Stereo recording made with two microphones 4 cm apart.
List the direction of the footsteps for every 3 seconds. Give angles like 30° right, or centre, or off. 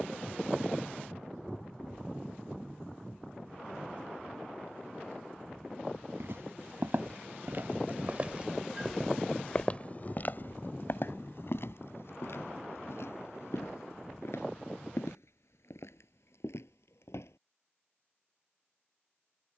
off, off, 40° right, 50° left, 70° left, 80° left, off.